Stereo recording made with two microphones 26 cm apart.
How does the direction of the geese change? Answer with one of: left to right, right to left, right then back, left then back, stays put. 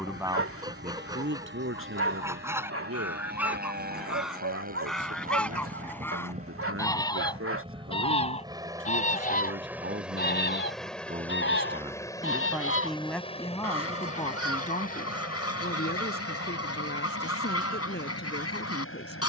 right to left.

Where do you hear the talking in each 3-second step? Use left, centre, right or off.
right, right, right, right, centre, left, left.